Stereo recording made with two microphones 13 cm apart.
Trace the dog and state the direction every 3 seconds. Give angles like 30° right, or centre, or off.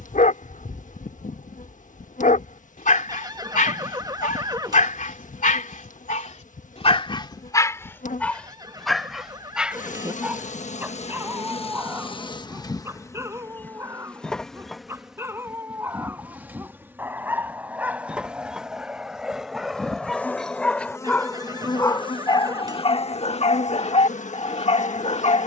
80° left, 80° left, 30° left, 10° right, 20° right, 20° right, centre, 40° left, 50° left.